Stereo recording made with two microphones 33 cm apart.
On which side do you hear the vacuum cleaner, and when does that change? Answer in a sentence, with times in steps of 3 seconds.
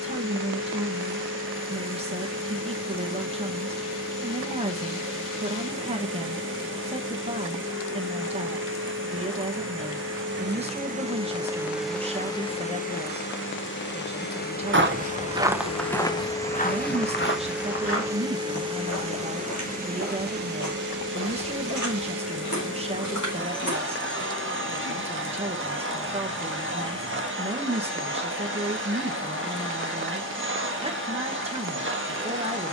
You can hear the vacuum cleaner on the right from 0 s, on the left from 12 s, in the centre from 15 s and on the right from 18 s.